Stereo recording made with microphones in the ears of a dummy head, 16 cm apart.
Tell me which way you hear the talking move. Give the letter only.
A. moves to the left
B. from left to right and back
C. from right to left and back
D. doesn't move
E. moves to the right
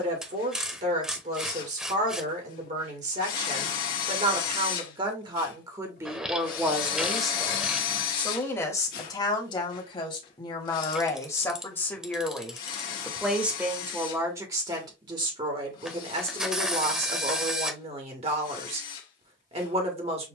C.